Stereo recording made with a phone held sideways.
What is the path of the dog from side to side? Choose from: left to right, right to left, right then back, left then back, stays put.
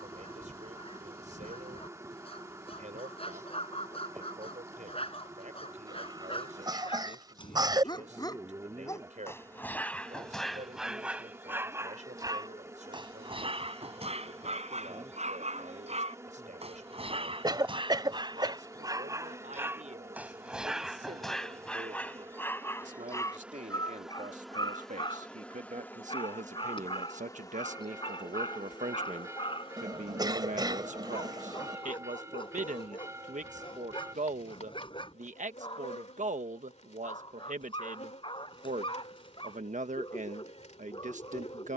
right then back.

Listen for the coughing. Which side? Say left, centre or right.
right.